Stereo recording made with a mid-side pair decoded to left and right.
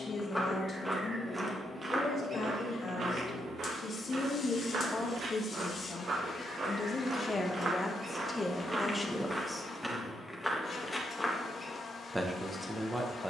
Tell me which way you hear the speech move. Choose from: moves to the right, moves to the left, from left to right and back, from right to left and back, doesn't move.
moves to the right.